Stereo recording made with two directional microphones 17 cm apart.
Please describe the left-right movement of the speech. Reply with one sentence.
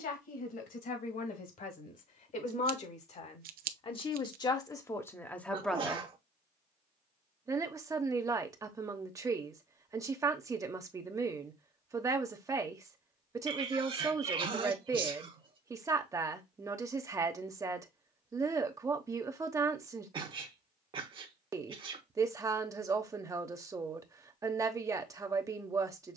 You can hear the speech go from the left side to the right.